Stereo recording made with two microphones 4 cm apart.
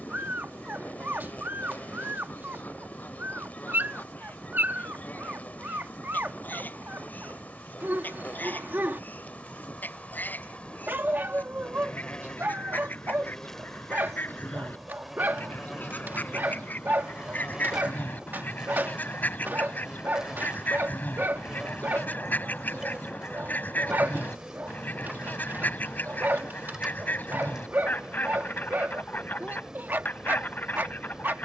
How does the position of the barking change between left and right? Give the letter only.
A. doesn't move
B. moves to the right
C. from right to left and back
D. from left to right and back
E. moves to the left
A.